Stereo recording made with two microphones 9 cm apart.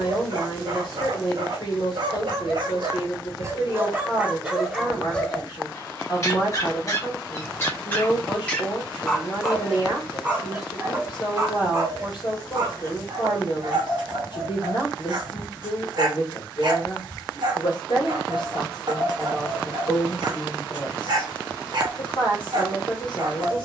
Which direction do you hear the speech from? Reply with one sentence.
In this clip you hear the speech on the left.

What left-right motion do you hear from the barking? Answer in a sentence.
In this clip you hear the barking move from right to left and back again.